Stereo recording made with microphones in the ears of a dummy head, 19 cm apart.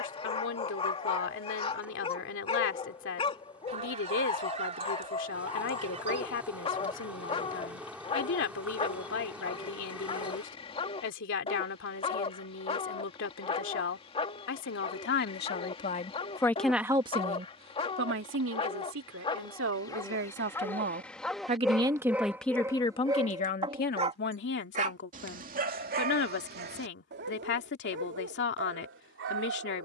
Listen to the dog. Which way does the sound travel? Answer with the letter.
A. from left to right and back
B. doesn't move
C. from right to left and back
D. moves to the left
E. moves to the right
E.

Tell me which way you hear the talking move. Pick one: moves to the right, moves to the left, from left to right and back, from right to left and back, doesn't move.
from left to right and back.